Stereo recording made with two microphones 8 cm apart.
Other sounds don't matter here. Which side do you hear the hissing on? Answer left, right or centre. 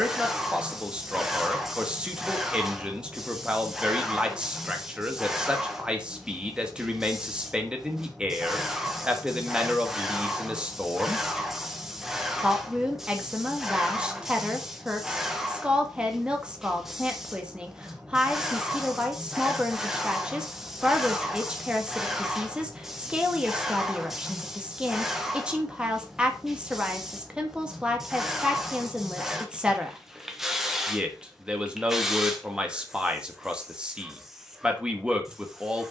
centre.